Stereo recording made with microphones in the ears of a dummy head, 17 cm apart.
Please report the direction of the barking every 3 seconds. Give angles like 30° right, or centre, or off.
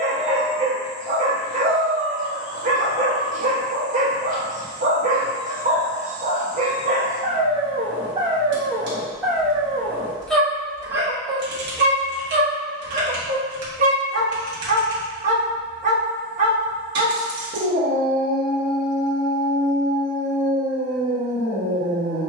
40° right, 40° right, 30° right, 10° right, 40° right, 40° right, 40° right, 40° right.